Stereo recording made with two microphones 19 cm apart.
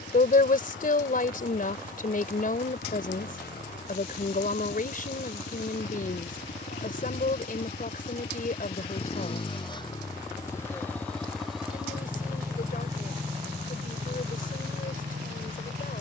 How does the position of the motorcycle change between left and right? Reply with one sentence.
You can hear the motorcycle move to the right.